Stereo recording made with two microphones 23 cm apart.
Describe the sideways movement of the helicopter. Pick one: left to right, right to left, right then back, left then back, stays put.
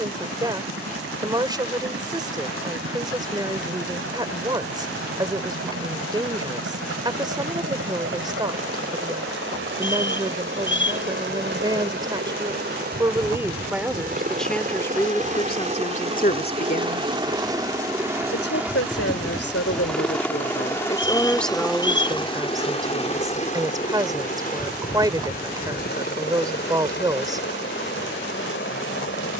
right to left.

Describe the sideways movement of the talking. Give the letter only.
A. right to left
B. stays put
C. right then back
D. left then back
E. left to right
D.